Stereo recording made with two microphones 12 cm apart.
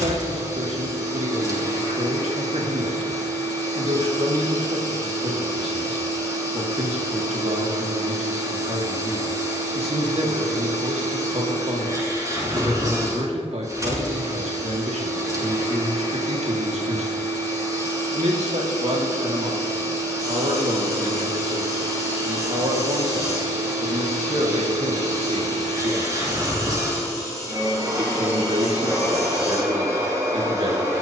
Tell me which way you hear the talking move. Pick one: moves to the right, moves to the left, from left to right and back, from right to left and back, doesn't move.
doesn't move.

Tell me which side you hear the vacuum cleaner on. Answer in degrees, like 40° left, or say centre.
30° right.